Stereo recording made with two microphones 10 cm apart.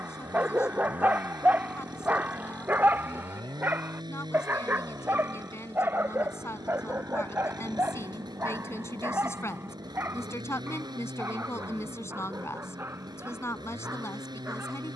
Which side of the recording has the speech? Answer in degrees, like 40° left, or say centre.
30° left.